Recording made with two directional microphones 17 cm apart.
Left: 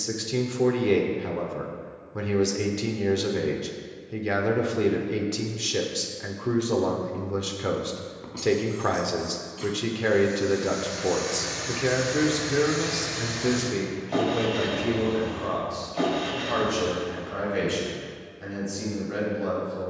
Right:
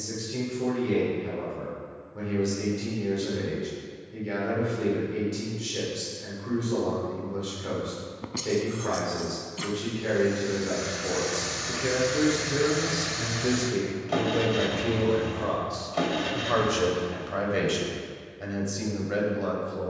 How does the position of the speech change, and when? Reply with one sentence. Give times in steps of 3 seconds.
In this clip you hear the speech on the left from 0 s, in the centre from 12 s and on the right from 15 s.